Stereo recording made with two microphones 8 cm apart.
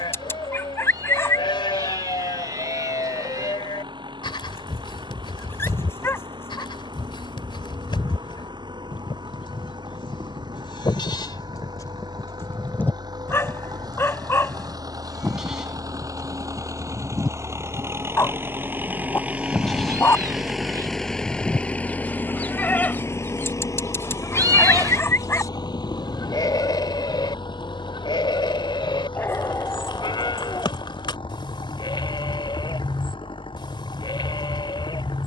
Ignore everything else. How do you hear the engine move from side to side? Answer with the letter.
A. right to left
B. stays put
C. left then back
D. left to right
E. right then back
A.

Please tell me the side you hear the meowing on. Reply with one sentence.
You can hear the meowing on the right.